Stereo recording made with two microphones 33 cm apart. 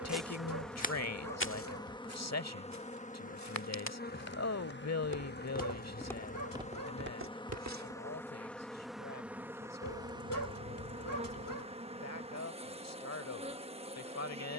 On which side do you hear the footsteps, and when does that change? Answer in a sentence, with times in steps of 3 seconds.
You can hear the footsteps on the left from 0 s, on the right from 6 s and not at all from 9 s.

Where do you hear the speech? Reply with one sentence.
You can hear the speech on the left.